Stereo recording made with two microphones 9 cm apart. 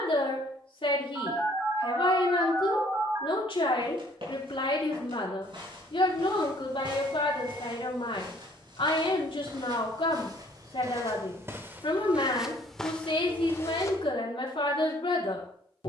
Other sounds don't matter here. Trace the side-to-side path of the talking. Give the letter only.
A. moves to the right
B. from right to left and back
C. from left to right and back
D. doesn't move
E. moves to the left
D.